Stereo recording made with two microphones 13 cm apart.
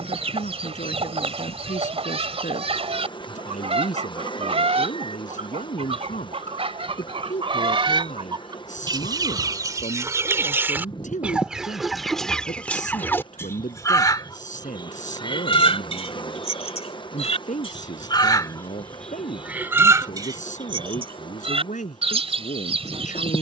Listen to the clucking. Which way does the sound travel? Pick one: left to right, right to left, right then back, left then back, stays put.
left then back.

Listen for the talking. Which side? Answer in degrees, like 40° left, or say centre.
70° left.